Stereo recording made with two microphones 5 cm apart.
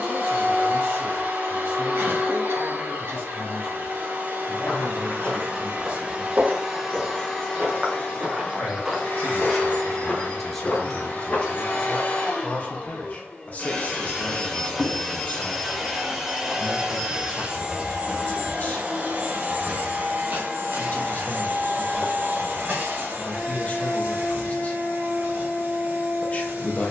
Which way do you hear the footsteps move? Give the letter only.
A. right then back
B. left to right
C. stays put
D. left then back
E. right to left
A.